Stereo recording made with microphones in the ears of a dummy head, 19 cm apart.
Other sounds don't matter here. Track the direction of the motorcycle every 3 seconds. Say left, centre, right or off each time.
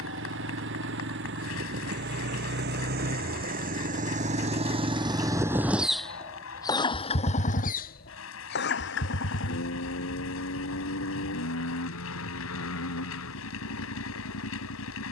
right, right, left, left, left.